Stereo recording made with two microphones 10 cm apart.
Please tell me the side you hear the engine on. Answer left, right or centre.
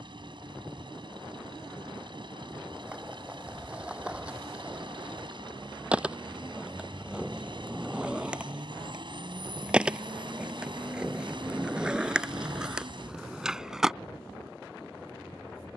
right.